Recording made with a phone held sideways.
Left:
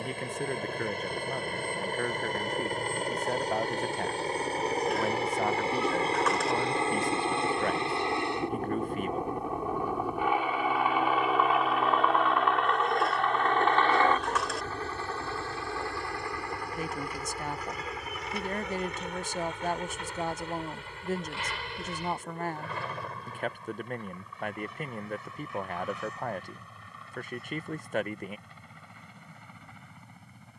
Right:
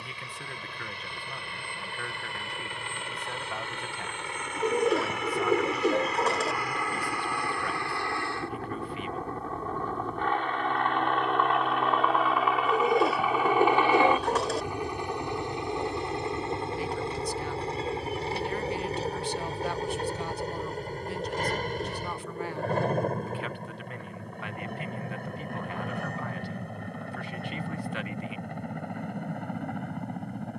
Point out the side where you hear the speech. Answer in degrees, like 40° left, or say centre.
40° left.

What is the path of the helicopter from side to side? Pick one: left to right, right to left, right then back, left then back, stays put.
left to right.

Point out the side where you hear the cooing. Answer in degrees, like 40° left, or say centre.
30° right.